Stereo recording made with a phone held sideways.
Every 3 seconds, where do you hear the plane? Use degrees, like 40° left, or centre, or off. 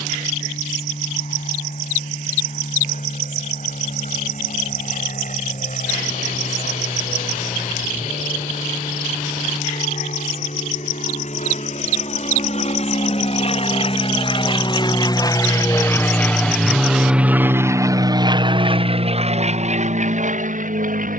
70° left, 70° left, 70° left, 60° left, 50° left, centre, 40° right.